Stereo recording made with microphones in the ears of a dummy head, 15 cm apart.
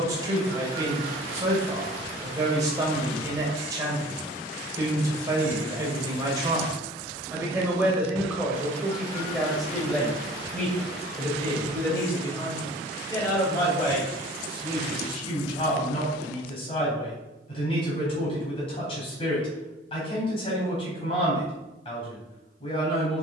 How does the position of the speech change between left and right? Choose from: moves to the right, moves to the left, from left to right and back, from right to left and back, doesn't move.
moves to the left.